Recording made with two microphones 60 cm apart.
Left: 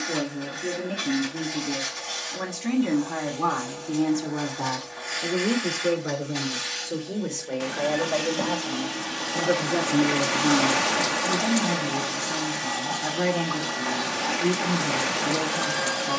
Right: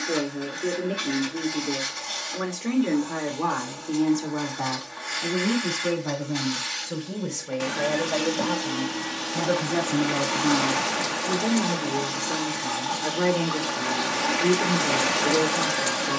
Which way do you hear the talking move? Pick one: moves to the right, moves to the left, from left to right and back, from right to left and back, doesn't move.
from left to right and back.